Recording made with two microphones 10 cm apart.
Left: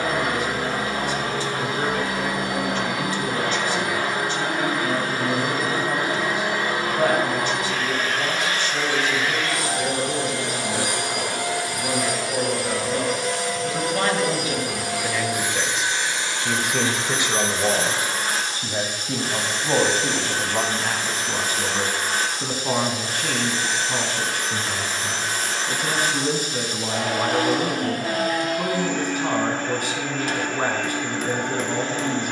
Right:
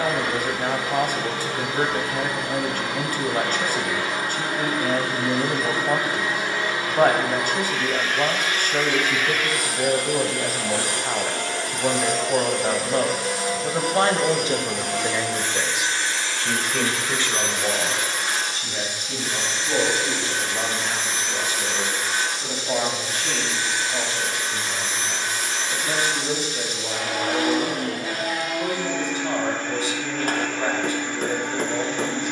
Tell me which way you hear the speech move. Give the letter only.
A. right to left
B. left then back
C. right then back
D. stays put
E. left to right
A.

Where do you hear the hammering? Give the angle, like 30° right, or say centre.
50° right.